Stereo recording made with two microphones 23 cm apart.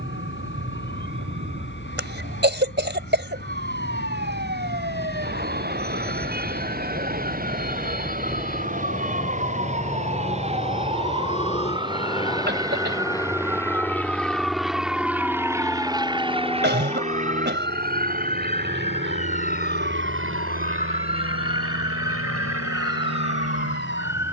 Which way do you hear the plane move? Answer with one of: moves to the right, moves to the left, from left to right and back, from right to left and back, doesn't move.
moves to the right.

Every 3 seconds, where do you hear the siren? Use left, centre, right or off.
right, right, right, right, centre, centre, left, left.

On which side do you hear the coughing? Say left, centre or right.
right.